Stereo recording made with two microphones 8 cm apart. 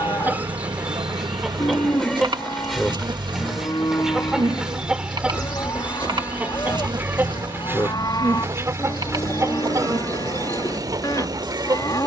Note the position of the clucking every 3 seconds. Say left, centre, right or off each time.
centre, centre, right, right.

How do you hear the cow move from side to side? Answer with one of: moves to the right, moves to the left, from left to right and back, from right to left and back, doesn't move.
doesn't move.